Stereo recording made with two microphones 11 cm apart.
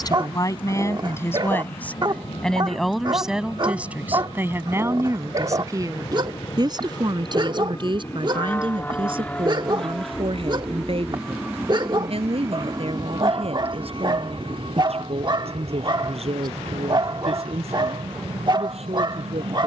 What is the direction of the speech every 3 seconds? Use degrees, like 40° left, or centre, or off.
20° left, 20° right, 50° right, 60° right, 60° right, 70° right, 70° right.